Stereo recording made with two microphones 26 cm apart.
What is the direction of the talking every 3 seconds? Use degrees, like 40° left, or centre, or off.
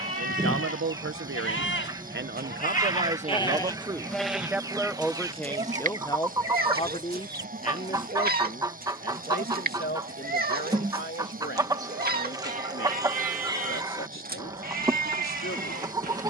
50° right, 10° right, 30° left, 40° left, 50° left, 50° left.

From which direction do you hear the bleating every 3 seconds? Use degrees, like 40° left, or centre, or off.
50° left, 10° right, 40° right, 40° right, 40° right, 40° right.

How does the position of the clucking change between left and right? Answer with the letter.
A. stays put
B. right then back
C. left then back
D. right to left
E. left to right
A.